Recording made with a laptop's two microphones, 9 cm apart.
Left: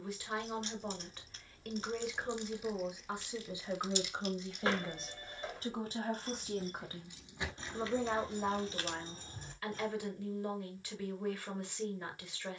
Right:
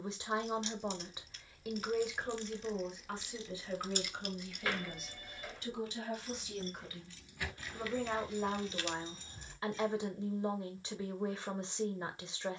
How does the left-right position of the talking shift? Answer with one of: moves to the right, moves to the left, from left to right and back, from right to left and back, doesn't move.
from right to left and back.